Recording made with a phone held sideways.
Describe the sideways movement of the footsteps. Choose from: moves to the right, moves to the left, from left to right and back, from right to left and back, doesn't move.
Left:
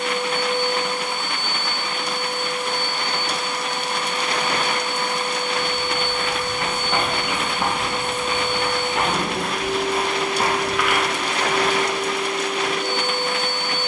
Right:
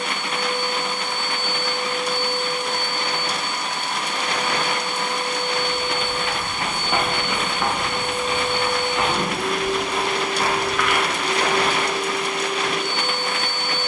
from right to left and back.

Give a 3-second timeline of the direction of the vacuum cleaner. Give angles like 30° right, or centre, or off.
10° right, 60° right, 40° right, 10° left, 20° left.